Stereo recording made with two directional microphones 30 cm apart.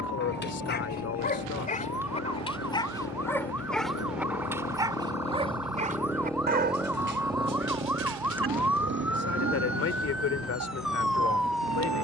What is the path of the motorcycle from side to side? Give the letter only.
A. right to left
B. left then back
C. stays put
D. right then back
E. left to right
E.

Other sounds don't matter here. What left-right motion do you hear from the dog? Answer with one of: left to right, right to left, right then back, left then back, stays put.
left to right.